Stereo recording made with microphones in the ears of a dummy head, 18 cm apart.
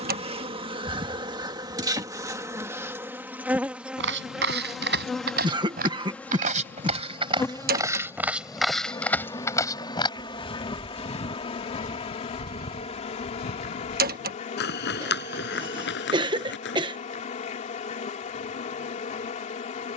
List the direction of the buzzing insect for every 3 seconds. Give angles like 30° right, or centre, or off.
20° right, centre, 10° left, 20° left, 30° left, 40° left, 40° left.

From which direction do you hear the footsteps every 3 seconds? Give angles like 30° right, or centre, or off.
off, 60° right, 20° right, 30° left, 50° left, 60° left, off.